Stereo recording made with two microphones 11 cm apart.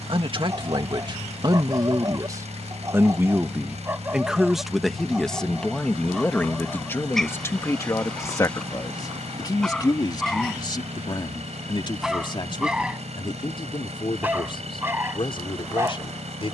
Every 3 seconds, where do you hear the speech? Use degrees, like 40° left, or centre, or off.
40° right, centre, 20° left, 40° left, 50° left, 50° left.